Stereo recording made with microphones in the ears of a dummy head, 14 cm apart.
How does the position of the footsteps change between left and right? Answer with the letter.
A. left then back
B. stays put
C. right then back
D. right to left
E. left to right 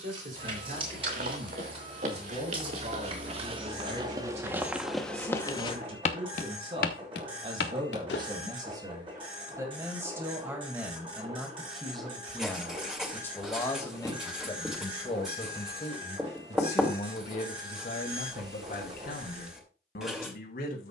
D.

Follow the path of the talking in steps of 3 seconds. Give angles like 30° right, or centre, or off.
50° right, 40° right, 30° right, 10° right, 20° left, 40° left, 60° left.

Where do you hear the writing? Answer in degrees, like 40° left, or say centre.
centre.